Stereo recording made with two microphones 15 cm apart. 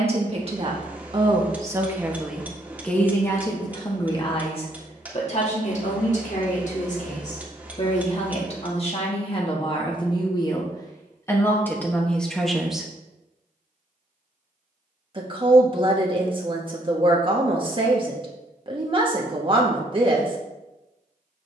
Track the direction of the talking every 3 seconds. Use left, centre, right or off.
right, left, left, left, centre, right, right.